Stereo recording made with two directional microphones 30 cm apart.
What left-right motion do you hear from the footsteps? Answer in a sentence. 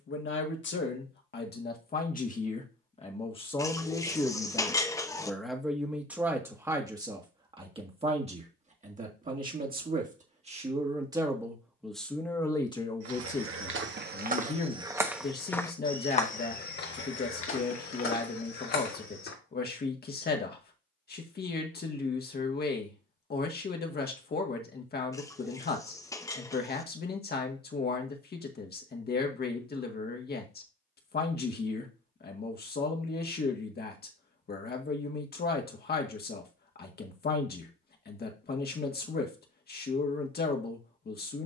In this clip you hear the footsteps move from right to left.